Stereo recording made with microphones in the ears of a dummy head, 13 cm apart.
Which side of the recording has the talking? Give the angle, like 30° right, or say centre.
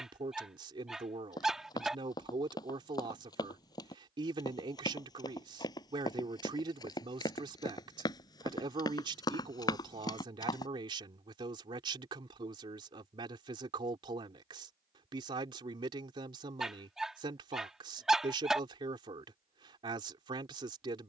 30° right.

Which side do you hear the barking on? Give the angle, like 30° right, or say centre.
centre.